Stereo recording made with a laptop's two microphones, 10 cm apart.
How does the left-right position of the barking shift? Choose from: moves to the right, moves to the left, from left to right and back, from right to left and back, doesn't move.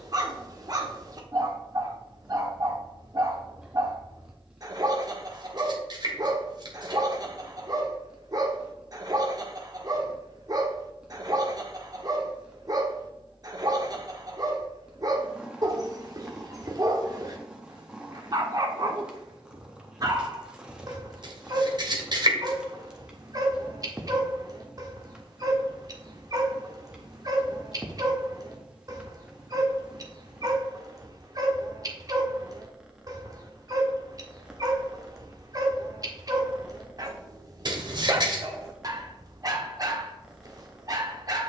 doesn't move.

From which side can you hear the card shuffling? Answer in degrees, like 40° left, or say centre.
50° right.